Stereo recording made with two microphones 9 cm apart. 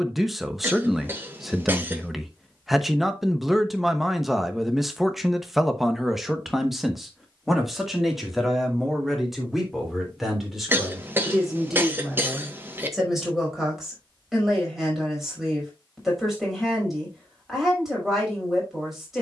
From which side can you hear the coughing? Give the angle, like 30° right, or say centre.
20° right.